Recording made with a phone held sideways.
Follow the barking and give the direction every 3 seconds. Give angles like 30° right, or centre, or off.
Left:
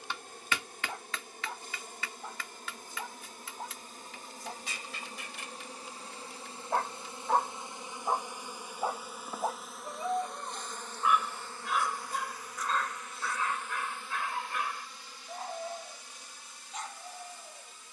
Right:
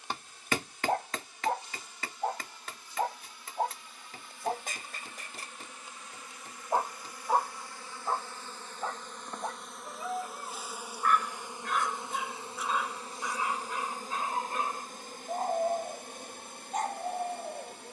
60° right, 50° right, centre, 10° left, 20° right, 50° right.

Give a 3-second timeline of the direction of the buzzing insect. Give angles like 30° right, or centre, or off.
50° left, 40° left, 20° left, 10° right, 40° right, 60° right.